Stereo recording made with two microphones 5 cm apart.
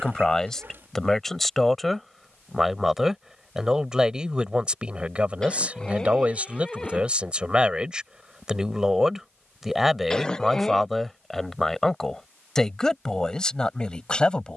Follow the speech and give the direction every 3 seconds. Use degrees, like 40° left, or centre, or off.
centre, 20° right, 20° right, centre, 10° left.